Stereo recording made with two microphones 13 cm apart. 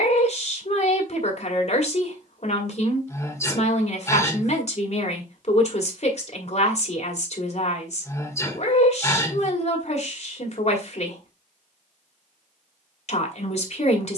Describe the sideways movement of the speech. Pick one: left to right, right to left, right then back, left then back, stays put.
stays put.